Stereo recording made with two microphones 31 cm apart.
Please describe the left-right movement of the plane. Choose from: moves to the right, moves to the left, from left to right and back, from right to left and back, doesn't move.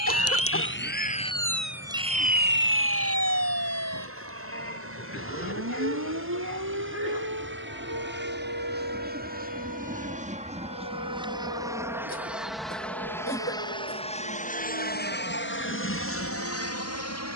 moves to the left.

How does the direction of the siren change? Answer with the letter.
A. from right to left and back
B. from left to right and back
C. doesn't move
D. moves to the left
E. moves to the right
E.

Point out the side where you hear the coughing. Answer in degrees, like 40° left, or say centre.
40° left.